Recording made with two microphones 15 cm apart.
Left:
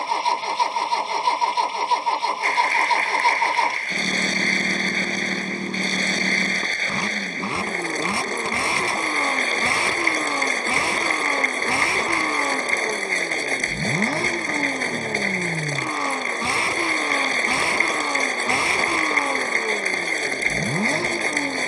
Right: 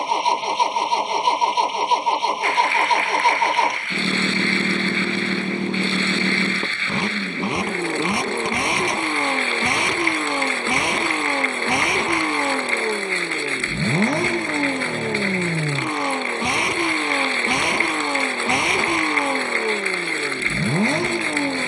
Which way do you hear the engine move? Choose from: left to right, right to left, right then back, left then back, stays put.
stays put.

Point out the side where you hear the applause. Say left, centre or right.
left.